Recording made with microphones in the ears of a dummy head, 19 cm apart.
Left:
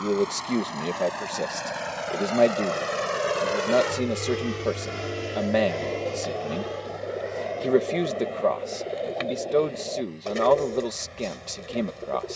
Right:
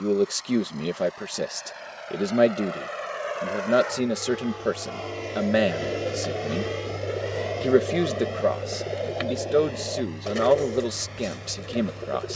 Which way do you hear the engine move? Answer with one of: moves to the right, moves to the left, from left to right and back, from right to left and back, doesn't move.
moves to the right.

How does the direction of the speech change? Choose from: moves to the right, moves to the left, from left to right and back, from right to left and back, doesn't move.
doesn't move.